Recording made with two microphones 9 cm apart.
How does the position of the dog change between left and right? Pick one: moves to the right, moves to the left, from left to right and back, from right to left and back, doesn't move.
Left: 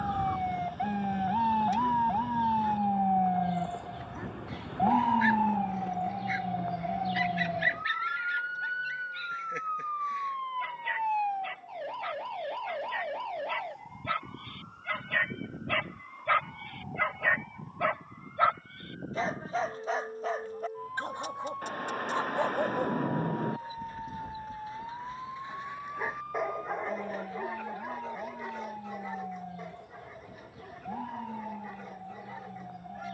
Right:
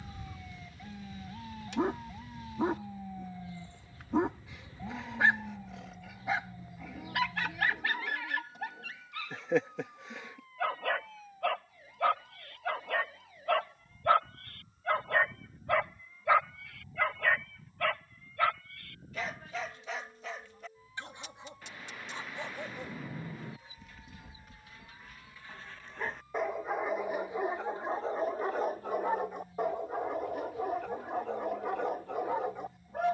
from right to left and back.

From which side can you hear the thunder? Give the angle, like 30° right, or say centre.
50° left.